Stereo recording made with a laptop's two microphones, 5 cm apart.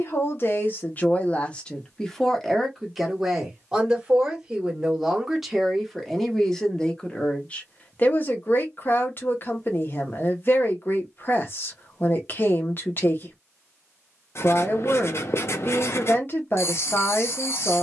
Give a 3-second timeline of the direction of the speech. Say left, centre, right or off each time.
left, centre, left, left, left, left.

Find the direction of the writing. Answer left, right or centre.
left.